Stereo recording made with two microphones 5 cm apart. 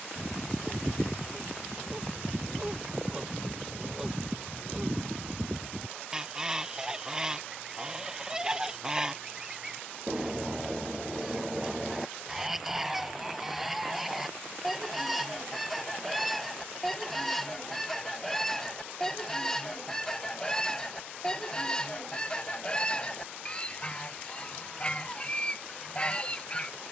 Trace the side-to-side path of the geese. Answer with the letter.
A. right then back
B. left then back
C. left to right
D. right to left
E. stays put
D.